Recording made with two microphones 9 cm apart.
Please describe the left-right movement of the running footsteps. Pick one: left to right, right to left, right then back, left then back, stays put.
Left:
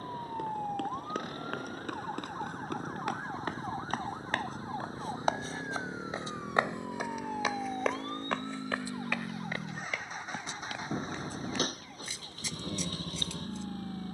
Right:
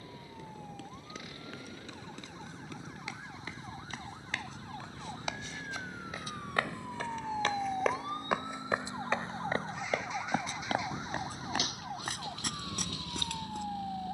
left to right.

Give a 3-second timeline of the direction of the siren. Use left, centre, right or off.
left, left, centre, right, right.